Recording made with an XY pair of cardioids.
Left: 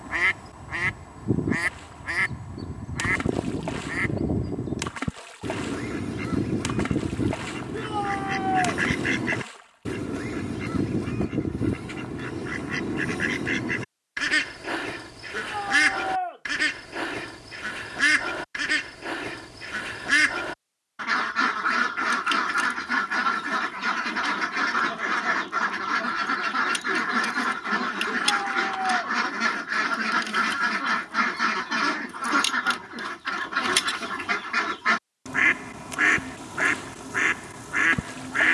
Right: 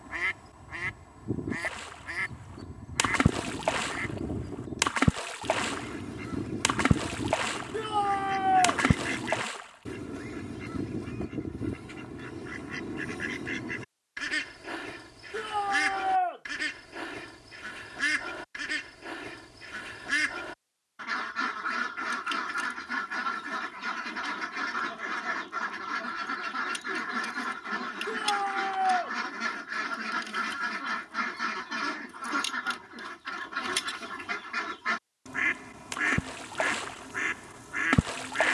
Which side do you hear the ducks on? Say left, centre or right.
left.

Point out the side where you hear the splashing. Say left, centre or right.
right.